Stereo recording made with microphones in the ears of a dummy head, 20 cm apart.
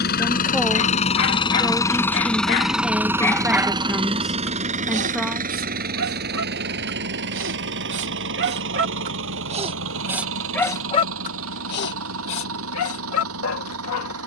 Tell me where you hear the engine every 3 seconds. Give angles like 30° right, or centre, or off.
20° left, 30° right, 50° right, 60° right, 60° right.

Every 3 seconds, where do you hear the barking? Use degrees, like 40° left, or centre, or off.
60° left, 30° right, 50° right, 10° left, 70° left.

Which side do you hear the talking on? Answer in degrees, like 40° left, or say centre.
centre.